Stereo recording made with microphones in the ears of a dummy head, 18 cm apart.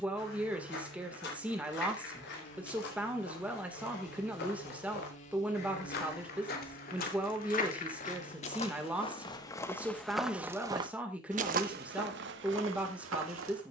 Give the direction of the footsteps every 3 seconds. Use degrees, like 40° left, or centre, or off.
60° left, 60° left, 40° left, 10° right, 70° right.